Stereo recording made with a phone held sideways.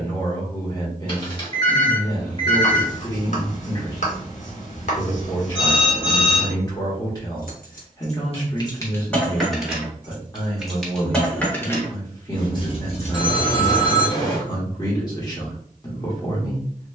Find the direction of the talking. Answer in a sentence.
In this clip you hear the talking on the left.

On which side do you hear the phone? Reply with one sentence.
You can hear the phone on the left.